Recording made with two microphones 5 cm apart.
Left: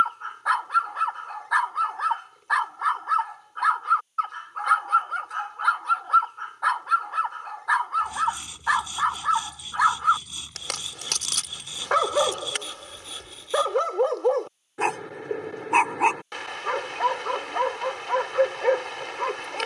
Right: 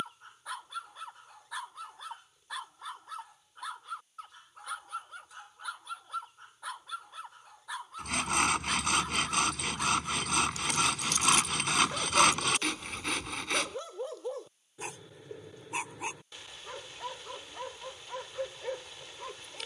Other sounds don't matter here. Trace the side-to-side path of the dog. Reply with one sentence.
In this clip you hear the dog stay put.